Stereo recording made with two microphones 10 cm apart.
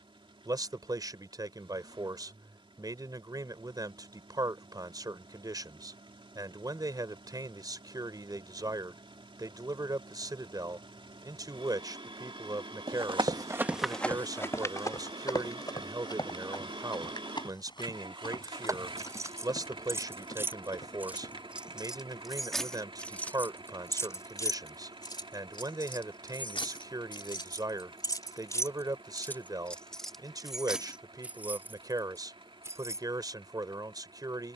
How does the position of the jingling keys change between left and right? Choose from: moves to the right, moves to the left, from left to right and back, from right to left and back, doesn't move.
from right to left and back.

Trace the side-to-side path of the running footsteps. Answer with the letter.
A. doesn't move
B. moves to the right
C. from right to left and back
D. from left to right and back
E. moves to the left
E.